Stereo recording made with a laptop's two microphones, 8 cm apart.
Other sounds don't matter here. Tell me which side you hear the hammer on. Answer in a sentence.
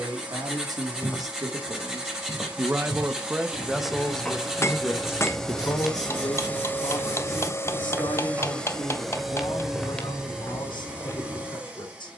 In this clip you hear the hammer on the left.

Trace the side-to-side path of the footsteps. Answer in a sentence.
In this clip you hear the footsteps go right and come back.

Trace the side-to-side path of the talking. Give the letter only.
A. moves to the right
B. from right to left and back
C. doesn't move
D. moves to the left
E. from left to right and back
D.